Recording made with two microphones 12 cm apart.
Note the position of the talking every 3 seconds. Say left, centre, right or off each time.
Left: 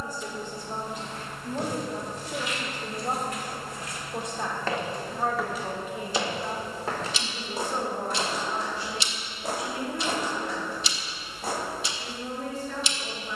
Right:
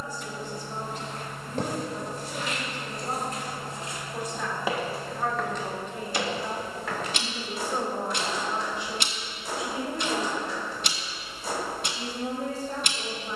left, left, centre, right, right.